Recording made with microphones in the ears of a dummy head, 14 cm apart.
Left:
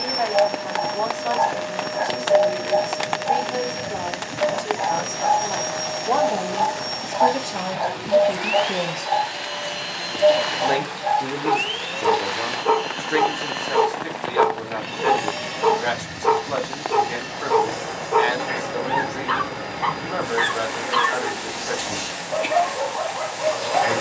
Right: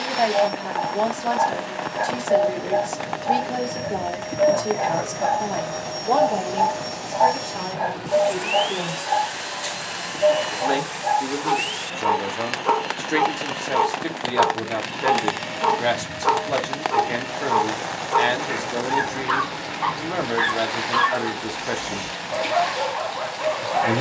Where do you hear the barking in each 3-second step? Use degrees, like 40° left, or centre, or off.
20° left, 30° right, centre, 20° left, 20° left, 20° left, 20° left, 20° left.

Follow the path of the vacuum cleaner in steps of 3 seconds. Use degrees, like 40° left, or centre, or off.
50° left, 40° left, centre, 30° left, 50° left, 50° left, 50° left, 50° left.